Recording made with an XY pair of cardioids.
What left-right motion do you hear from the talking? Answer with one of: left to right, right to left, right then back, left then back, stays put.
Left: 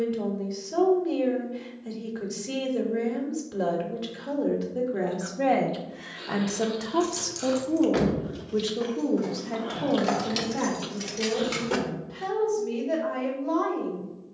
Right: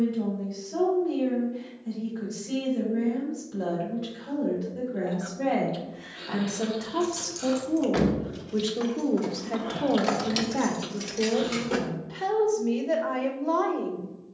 left to right.